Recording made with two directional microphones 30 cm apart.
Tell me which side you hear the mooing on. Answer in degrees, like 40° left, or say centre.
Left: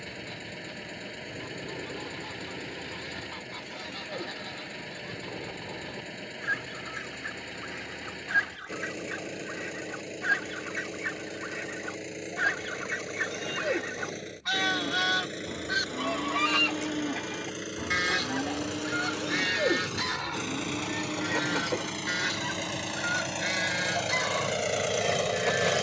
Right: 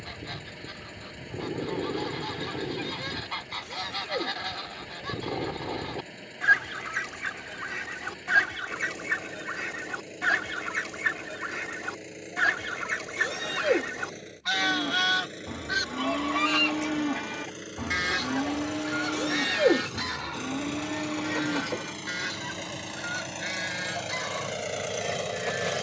30° right.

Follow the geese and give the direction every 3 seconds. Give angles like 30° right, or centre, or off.
70° right, 70° right, 60° right, 40° right, 20° right, 10° right, 10° left, 20° left, 20° left.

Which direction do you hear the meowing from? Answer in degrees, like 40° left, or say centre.
40° right.